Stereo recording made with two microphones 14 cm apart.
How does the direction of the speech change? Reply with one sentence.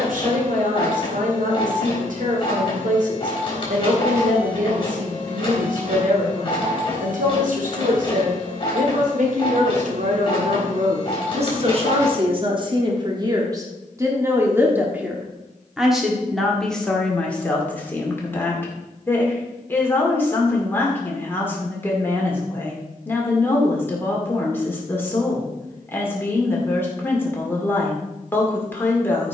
You can hear the speech travel towards the left.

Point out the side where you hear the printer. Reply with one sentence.
You can hear the printer on the left.